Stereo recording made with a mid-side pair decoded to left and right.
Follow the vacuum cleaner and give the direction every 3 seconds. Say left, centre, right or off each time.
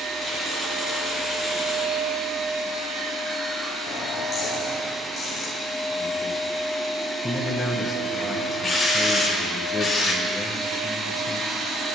right, right, centre, right.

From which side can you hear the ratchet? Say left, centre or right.
left.